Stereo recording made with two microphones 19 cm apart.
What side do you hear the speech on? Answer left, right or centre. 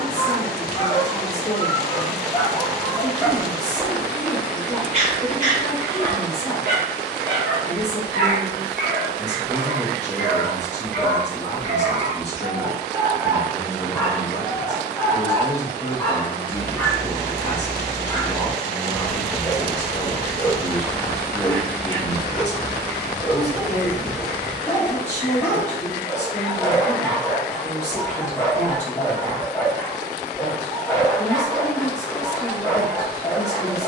left.